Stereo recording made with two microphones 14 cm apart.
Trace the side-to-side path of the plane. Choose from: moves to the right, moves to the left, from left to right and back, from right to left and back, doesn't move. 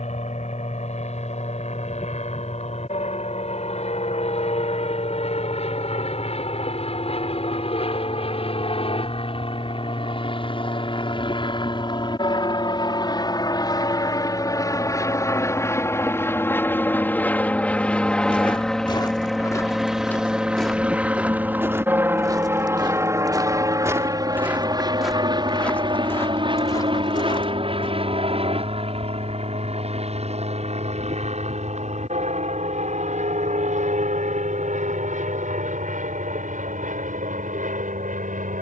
moves to the right.